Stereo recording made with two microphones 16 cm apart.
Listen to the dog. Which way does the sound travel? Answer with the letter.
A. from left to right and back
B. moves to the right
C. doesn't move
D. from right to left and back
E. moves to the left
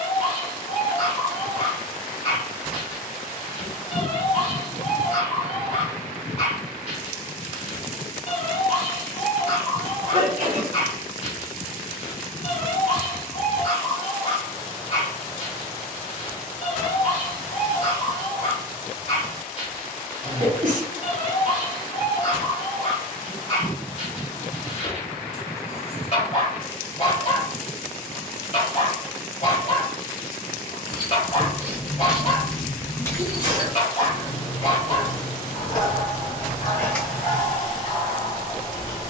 C.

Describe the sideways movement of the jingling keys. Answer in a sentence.
In this clip you hear the jingling keys move from right to left and back again.